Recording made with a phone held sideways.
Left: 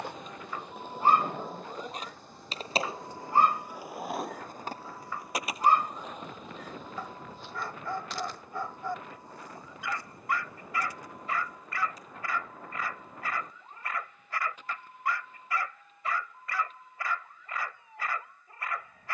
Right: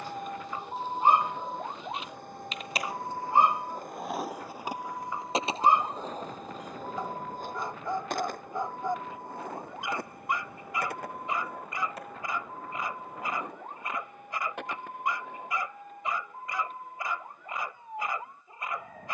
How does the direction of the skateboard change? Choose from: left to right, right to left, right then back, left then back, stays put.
left to right.